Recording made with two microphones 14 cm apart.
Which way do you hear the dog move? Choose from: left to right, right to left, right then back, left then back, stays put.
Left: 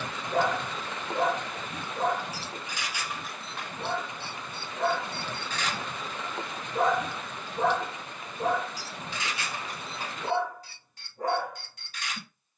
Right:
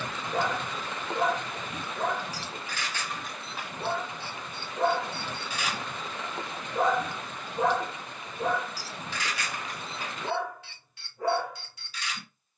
right then back.